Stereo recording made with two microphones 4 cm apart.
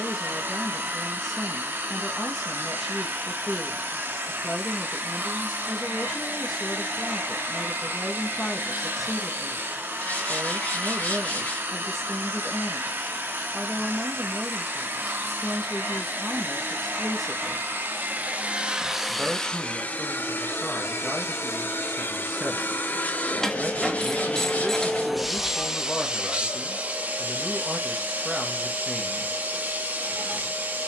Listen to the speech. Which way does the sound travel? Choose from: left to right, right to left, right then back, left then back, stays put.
stays put.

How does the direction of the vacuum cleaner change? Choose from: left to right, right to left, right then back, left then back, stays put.
left then back.